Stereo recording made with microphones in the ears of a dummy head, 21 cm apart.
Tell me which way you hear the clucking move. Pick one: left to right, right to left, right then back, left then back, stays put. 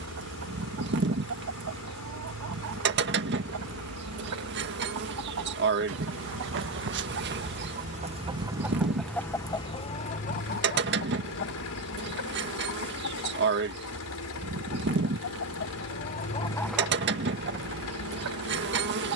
left then back.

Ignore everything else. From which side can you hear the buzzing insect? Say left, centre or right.
right.